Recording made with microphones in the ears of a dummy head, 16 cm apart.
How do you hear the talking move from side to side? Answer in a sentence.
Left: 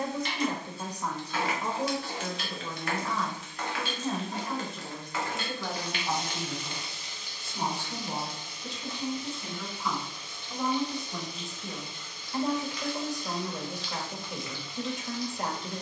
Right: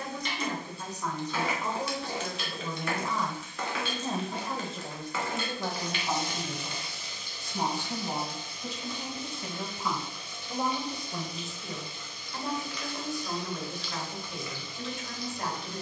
In this clip you hear the talking move from left to right and back again.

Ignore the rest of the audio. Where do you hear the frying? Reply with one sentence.
In this clip you hear the frying on the right.